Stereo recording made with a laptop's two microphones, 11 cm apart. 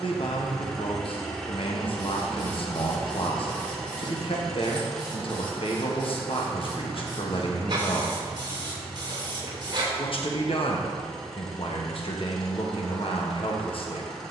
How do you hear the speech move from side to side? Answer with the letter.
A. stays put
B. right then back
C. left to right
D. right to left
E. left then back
A.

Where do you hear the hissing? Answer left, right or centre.
right.